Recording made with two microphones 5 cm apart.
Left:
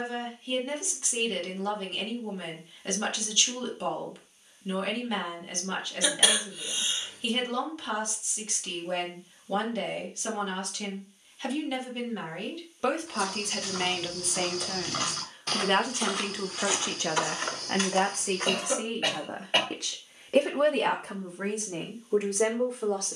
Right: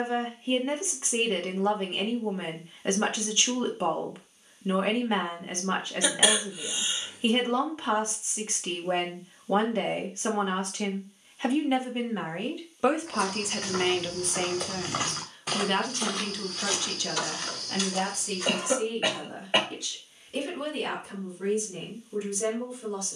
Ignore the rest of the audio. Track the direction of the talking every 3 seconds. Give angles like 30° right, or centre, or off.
30° right, 30° right, 30° right, 30° right, 10° right, 30° left, 60° left, 70° left.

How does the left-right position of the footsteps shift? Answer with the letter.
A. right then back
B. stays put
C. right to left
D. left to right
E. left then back
C.